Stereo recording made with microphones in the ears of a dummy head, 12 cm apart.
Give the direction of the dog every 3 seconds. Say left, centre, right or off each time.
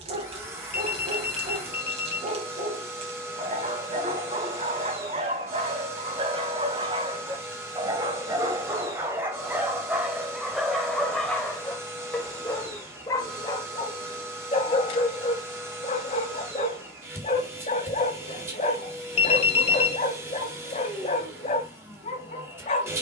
right, right, right, centre, left, left, left, left.